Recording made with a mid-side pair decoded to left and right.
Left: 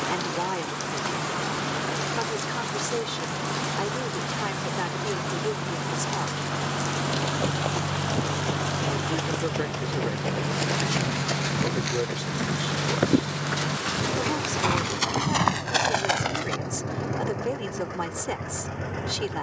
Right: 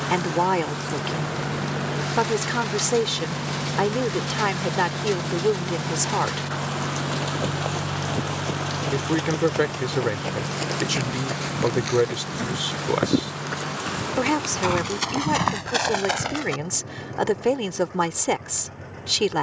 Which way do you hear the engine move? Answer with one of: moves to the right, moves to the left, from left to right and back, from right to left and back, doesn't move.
moves to the left.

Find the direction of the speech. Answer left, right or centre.
right.